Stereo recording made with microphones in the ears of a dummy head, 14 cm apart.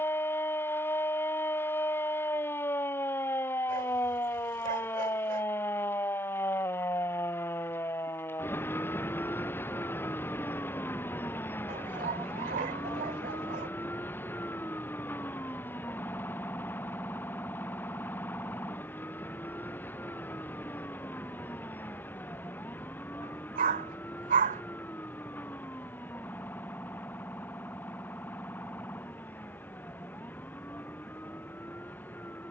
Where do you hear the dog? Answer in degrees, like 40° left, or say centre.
50° right.